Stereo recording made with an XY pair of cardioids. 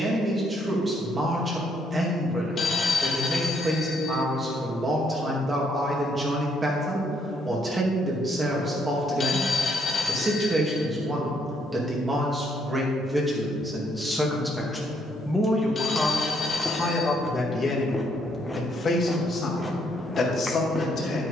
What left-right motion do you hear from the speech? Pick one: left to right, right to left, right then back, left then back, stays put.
right to left.